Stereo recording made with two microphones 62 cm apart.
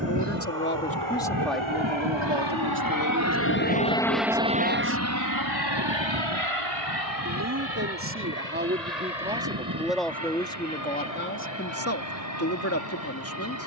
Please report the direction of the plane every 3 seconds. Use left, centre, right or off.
left, centre, right, right, right.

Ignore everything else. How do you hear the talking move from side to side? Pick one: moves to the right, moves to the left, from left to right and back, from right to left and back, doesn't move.
from left to right and back.